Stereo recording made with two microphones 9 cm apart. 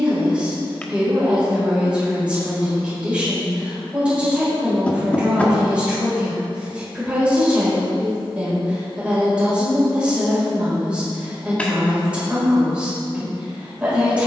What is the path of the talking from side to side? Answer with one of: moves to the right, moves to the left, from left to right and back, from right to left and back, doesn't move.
doesn't move.